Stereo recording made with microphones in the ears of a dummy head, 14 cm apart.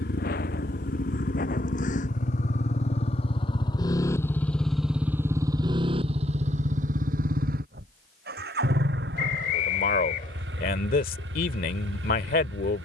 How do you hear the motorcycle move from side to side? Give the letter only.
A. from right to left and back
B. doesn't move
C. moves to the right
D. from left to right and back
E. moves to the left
C.